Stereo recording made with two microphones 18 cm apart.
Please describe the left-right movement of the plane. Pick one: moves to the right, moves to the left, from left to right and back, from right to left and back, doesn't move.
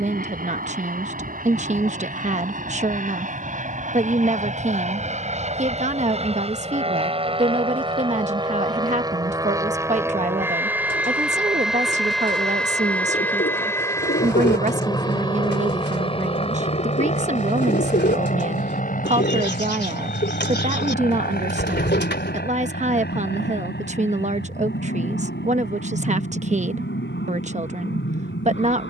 moves to the left.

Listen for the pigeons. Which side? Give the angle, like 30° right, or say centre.
70° left.